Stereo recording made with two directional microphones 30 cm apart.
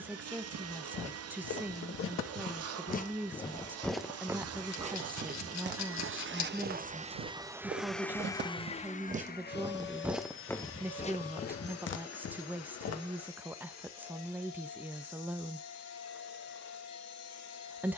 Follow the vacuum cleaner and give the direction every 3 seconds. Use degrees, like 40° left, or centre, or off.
60° right, 60° right, 10° right, 40° left, 60° left, 60° left.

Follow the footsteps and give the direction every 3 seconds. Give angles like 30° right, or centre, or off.
50° left, 10° right, 40° right, 10° left, 60° left, off.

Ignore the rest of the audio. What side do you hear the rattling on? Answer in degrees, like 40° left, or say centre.
70° left.